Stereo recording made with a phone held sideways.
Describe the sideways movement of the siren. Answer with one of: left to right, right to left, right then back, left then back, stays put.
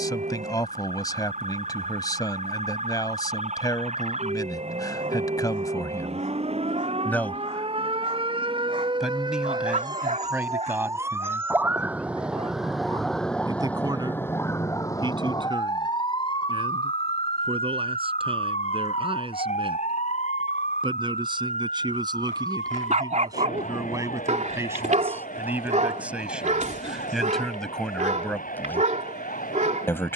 right to left.